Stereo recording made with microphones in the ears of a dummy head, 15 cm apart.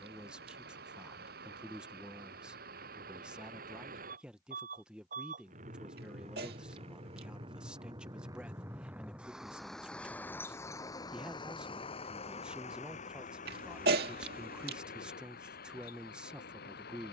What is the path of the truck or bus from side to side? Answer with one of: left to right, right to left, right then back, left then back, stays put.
right to left.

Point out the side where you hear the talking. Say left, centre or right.
centre.